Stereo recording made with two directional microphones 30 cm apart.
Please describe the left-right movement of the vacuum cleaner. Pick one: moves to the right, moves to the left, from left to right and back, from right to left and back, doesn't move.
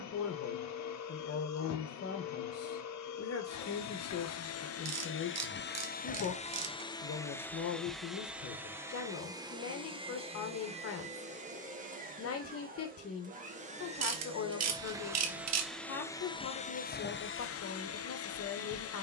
from left to right and back.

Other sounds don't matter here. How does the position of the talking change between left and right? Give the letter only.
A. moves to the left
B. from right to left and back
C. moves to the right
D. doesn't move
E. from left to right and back
D.